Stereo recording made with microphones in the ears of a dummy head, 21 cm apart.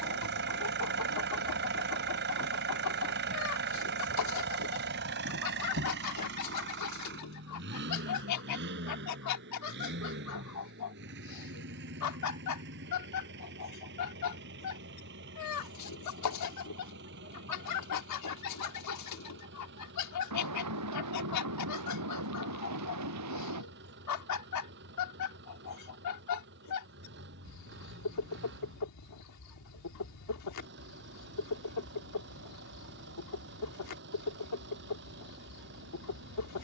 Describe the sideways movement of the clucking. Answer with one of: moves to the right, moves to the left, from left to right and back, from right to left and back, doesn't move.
doesn't move.